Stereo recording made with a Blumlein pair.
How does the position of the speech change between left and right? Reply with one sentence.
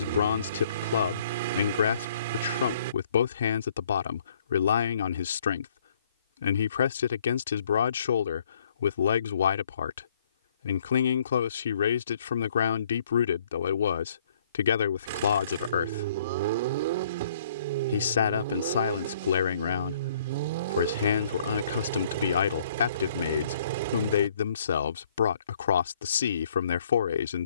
You can hear the speech stay put.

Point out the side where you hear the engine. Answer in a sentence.
In this clip you hear the engine on the right.